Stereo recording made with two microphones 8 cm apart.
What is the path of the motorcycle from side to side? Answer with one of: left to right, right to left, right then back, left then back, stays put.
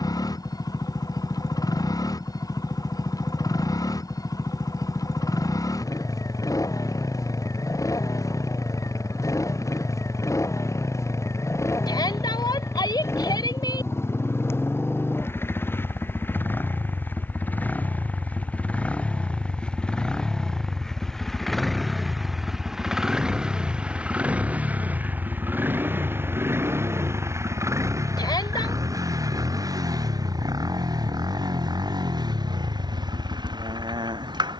left to right.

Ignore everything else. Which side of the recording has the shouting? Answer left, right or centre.
left.